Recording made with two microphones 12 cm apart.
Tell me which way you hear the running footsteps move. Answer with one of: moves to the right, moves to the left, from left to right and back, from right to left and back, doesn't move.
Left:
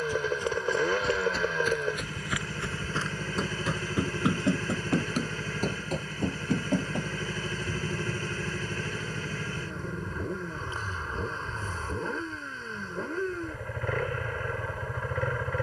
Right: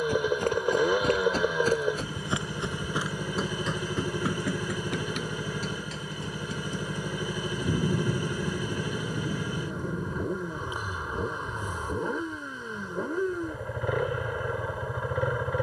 moves to the left.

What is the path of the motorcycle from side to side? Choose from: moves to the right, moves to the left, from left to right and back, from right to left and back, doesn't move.
doesn't move.